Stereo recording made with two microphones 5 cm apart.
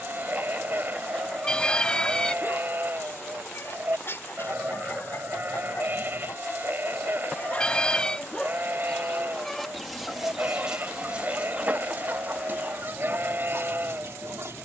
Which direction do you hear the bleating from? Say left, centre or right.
right.